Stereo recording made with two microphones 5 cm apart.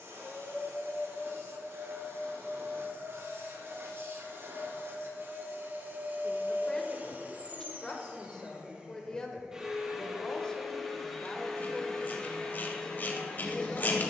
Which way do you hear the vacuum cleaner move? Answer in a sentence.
In this clip you hear the vacuum cleaner go from the right side to the left.